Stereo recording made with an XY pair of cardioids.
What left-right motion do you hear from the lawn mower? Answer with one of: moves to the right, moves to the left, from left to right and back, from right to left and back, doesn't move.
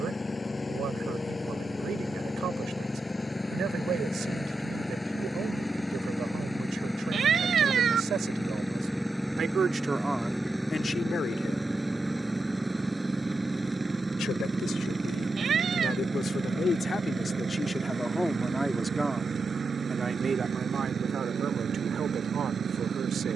moves to the right.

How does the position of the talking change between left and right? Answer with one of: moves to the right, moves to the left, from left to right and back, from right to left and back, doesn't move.
from right to left and back.